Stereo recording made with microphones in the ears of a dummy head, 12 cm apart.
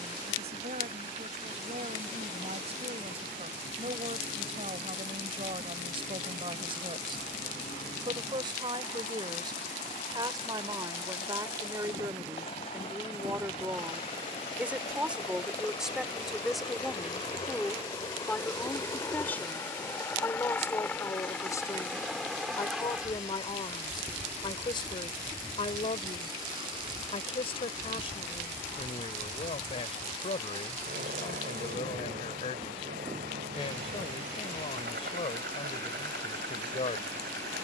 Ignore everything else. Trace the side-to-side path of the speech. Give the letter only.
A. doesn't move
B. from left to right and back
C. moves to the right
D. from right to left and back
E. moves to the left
E.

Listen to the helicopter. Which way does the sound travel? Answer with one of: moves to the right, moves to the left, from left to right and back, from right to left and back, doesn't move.
moves to the right.